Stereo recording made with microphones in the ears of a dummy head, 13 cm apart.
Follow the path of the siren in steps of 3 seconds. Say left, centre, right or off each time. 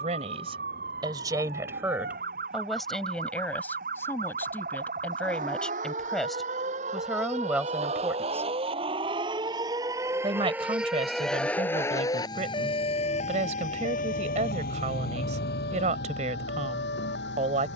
right, right, right, centre, left, left.